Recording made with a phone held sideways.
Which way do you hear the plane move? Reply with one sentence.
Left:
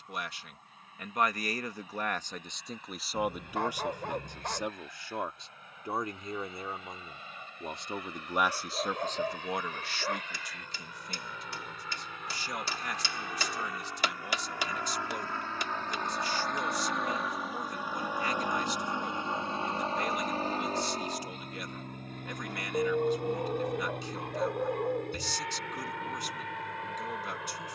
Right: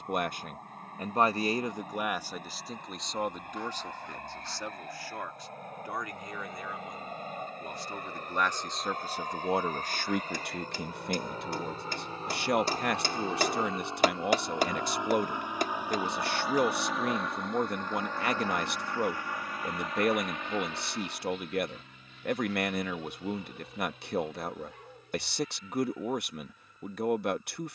In this clip you hear the plane move to the left.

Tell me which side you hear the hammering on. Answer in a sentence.
In this clip you hear the hammering on the right.